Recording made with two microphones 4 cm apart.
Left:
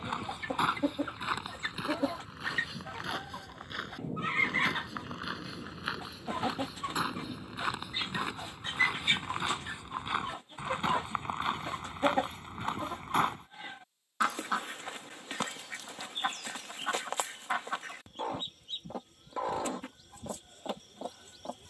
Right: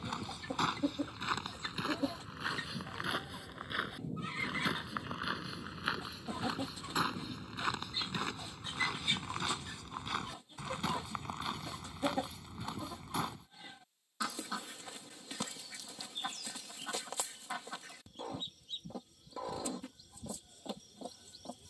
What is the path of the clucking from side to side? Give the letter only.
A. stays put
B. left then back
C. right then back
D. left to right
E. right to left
A.